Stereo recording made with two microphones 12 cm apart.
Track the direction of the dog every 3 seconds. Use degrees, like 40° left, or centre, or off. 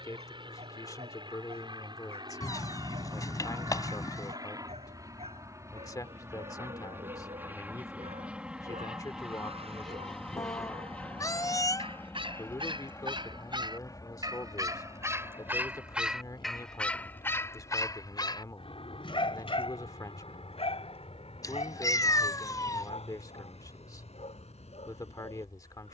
70° right, 70° right, 70° right, 60° right, 40° right, centre, 60° left, 70° left, 80° left.